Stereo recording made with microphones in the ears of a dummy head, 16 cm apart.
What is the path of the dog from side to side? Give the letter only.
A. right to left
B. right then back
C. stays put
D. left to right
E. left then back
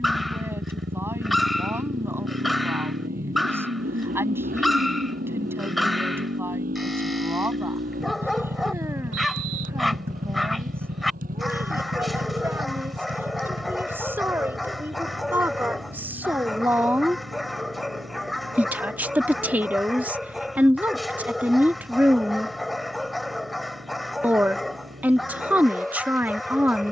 C.